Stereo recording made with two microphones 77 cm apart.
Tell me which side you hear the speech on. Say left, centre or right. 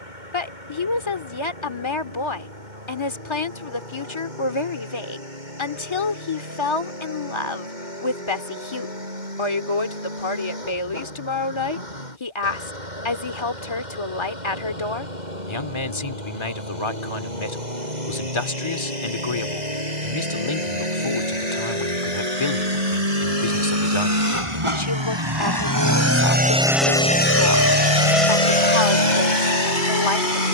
left.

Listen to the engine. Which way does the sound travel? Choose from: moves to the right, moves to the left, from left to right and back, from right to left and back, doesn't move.
moves to the left.